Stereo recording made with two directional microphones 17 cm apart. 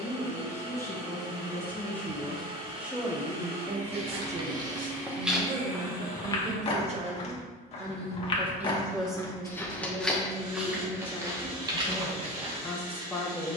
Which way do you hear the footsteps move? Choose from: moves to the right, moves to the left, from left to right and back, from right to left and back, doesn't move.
from right to left and back.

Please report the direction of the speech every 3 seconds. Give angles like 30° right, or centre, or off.
10° left, 40° right, 30° right, 10° left, 10° left.